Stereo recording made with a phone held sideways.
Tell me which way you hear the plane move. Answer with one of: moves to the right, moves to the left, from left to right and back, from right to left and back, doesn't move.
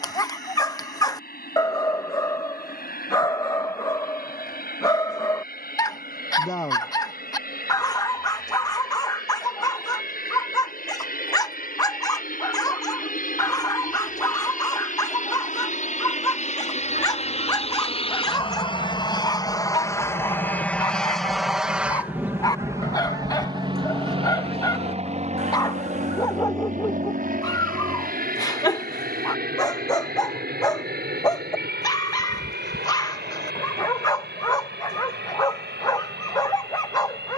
moves to the right.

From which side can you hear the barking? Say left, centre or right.
left.